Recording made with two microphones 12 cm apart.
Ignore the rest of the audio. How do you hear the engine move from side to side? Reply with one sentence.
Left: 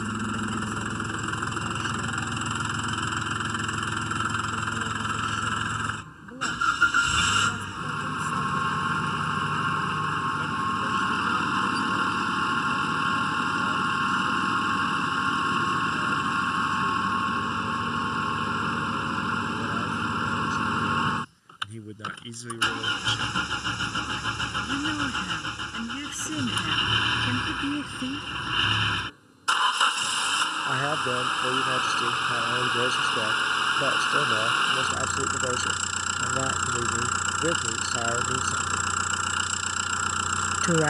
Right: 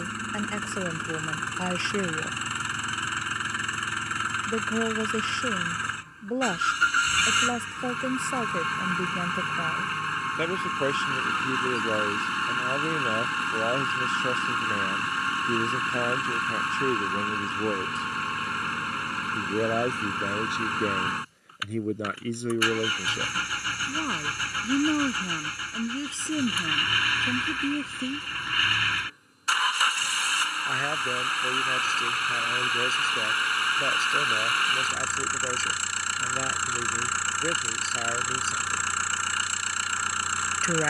You can hear the engine stay in one place.